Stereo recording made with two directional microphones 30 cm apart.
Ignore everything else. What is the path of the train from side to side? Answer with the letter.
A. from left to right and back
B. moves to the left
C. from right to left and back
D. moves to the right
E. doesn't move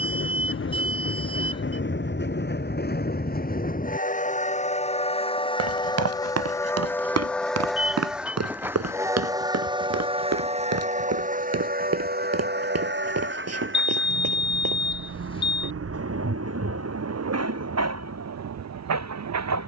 D.